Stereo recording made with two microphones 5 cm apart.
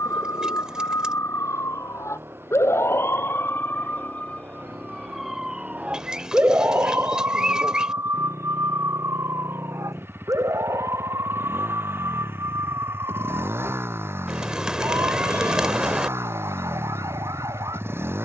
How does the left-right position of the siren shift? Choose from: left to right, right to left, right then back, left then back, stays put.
left to right.